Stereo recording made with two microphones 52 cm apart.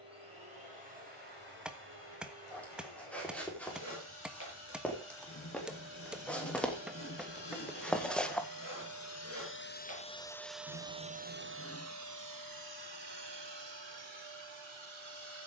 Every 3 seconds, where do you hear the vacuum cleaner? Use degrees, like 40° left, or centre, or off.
70° left, 70° left, 50° left, centre, 50° right.